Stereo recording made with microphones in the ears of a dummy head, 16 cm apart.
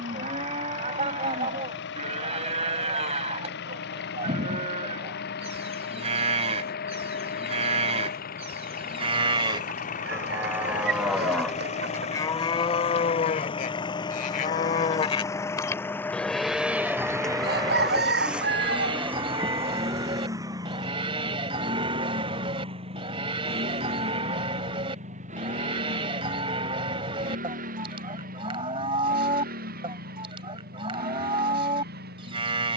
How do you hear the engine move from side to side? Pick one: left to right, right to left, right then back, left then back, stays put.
left to right.